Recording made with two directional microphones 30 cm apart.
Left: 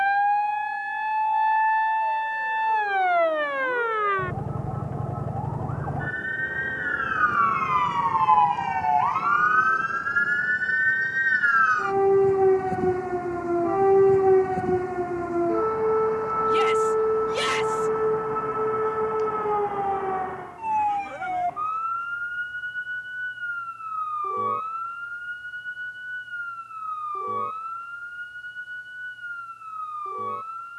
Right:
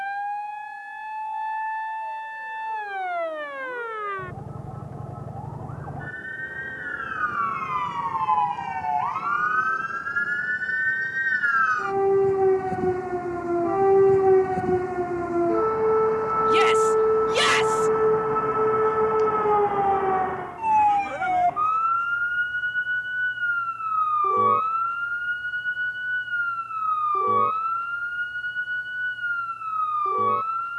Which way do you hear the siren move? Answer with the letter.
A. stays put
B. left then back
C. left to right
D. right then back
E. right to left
C.